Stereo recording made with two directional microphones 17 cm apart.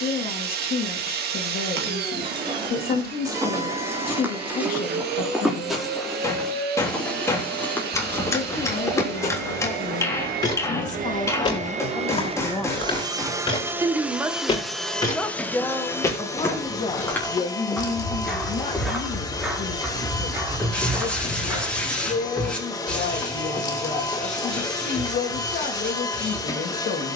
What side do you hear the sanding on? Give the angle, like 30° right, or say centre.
10° left.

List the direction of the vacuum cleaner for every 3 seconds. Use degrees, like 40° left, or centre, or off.
60° right, 60° right, 60° right, 50° right, 20° right, 20° left, 20° left, 20° left, 20° left.